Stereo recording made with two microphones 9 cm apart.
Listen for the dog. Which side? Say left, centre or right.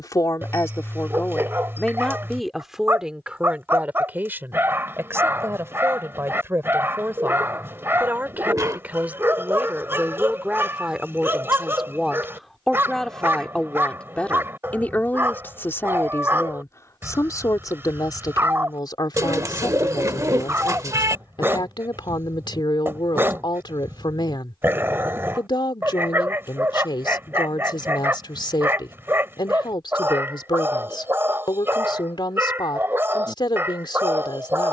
right.